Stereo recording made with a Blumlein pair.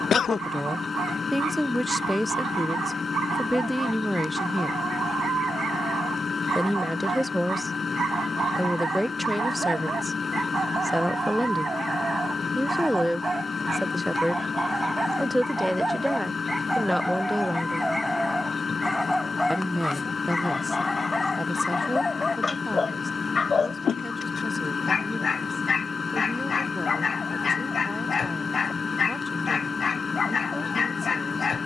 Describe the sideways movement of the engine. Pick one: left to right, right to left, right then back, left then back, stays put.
stays put.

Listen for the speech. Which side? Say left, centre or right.
centre.